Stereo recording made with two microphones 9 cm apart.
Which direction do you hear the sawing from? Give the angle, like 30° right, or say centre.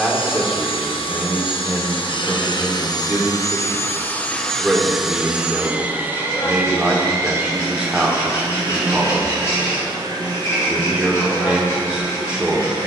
30° left.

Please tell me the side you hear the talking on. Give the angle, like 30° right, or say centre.
10° right.